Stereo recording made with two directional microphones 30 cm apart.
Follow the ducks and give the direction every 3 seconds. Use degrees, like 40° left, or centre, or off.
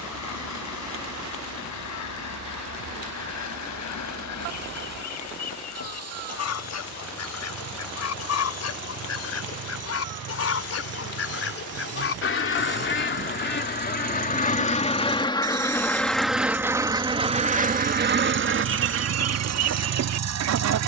60° left, 60° left, 60° left, 50° left, 30° left, 10° right, 50° right.